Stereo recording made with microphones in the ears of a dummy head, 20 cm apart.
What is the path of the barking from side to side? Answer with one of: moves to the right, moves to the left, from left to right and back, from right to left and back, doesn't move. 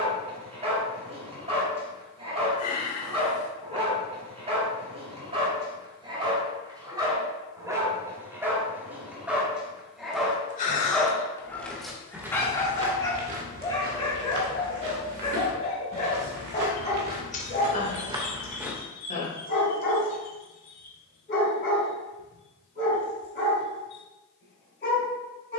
moves to the left.